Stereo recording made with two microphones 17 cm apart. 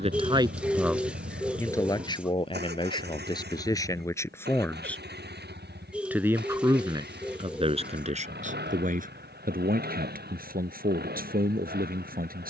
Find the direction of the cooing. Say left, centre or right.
centre.